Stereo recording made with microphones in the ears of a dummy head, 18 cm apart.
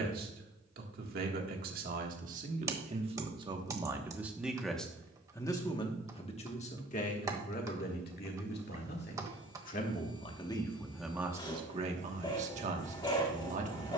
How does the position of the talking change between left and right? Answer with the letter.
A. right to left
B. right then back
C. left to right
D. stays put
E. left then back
E.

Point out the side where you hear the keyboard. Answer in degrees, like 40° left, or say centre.
20° right.